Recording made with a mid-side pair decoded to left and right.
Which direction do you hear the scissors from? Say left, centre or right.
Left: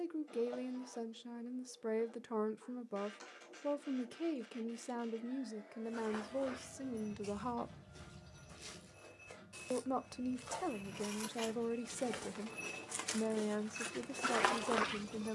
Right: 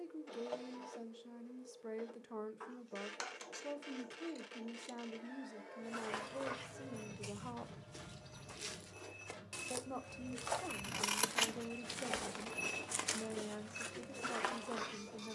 right.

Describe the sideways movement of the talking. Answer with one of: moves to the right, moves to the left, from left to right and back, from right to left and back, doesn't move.
doesn't move.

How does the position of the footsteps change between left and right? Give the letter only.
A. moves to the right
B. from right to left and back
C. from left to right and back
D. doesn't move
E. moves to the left
E.